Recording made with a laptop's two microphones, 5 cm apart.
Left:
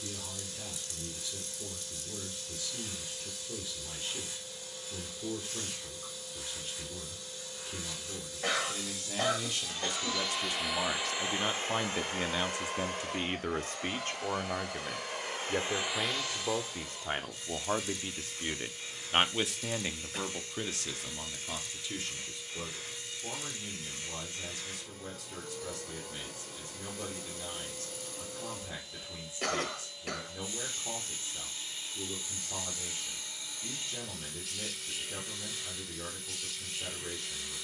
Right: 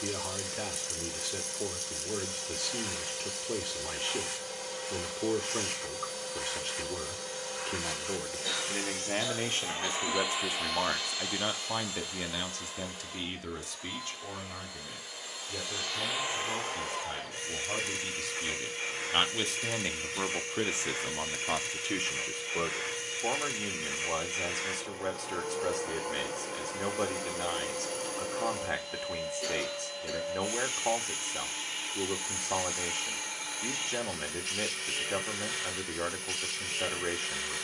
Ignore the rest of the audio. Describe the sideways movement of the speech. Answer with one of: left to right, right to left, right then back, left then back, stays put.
left then back.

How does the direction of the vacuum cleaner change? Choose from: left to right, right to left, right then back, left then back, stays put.
left then back.